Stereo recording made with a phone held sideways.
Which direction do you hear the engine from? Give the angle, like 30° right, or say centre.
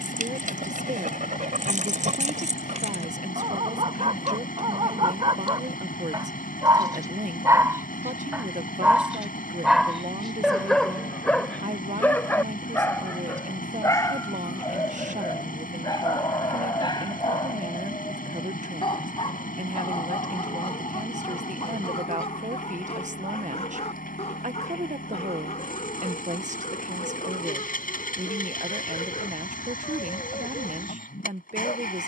80° left.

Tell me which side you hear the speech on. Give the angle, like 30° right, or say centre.
60° right.